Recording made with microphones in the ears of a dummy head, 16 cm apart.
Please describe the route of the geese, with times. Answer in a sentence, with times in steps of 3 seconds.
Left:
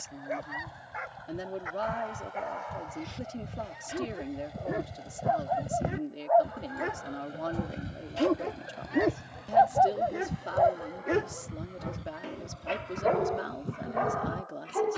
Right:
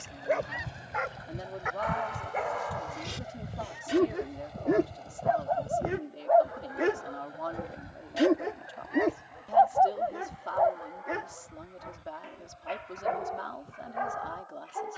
You can hear the geese on the right from 0 s, in the centre from 3 s and on the left from 6 s.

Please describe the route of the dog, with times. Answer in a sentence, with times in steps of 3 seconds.
You can hear the dog on the right from 0 s and on the left from 9 s.